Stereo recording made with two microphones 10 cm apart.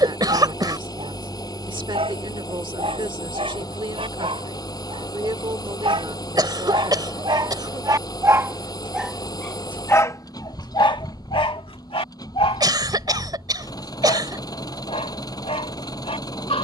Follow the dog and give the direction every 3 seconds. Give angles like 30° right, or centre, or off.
70° right, 70° right, 40° right, 40° left, 80° left, 80° left.